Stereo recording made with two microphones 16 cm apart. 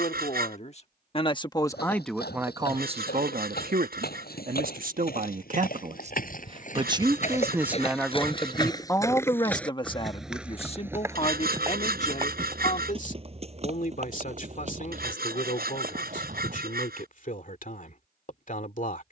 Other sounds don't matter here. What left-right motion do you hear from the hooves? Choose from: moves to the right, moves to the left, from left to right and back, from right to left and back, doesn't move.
moves to the right.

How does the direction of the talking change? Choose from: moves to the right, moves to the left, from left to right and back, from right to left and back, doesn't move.
from left to right and back.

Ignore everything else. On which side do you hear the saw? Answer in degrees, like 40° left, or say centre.
70° right.